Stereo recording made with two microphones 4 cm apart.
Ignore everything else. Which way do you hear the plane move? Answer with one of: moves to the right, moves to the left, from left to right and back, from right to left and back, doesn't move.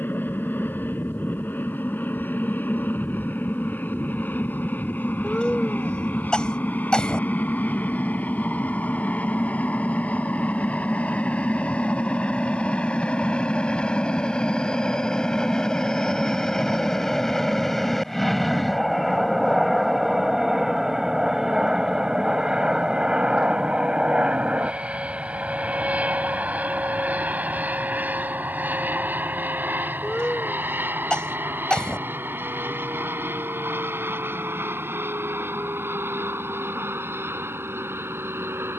moves to the right.